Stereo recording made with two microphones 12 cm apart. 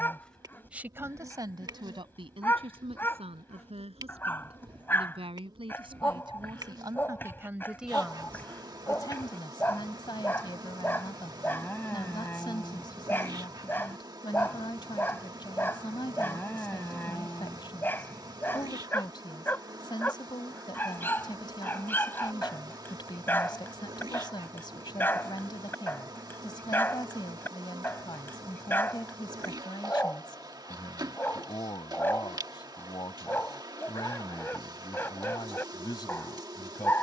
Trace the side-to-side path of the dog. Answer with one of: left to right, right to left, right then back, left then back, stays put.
stays put.